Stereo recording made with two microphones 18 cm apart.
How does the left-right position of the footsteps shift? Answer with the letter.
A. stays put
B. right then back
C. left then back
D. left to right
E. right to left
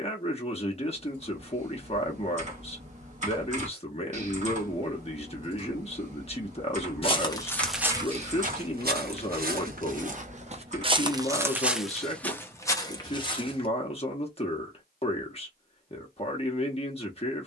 B.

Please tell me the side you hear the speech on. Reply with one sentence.
In this clip you hear the speech on the left.